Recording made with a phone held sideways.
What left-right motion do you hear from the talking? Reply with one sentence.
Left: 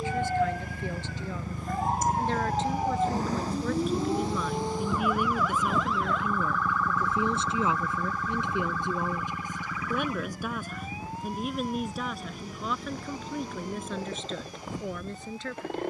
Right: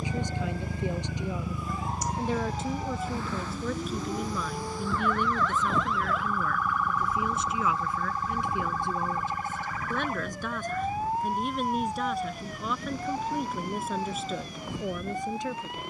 You can hear the talking move from right to left and back again.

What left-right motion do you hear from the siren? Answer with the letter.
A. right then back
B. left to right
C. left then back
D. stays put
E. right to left
B.